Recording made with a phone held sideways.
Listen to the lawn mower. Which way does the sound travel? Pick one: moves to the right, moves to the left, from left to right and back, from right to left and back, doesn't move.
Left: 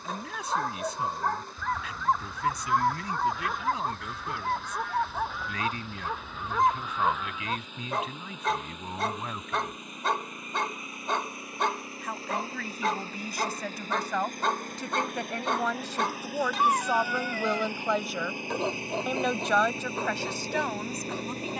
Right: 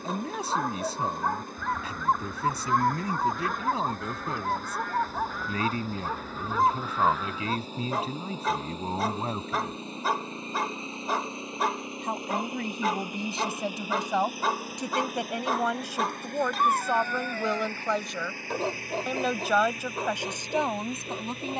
moves to the left.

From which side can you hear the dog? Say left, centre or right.
centre.